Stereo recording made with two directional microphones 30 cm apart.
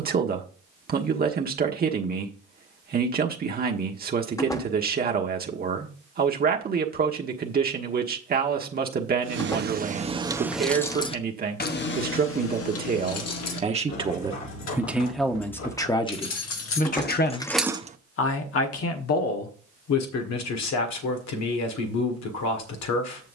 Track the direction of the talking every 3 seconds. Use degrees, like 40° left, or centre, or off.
30° right, 30° right, 30° right, 30° right, 20° right, 20° left, 60° left, 70° left.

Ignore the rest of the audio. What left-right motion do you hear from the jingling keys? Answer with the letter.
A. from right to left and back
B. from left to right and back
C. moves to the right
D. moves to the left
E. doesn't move
A.